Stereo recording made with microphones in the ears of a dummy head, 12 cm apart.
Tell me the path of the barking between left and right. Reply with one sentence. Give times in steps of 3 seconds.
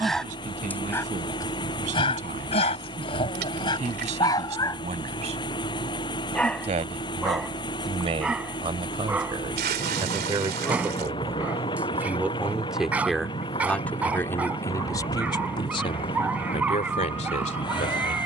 In this clip you hear the barking on the left from 0 s and in the centre from 6 s.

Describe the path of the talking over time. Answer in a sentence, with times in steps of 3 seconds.
You can hear the talking on the right from 0 s, in the centre from 12 s and on the left from 15 s.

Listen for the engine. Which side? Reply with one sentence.
You can hear the engine on the left.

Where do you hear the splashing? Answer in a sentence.
In this clip you hear the splashing on the right.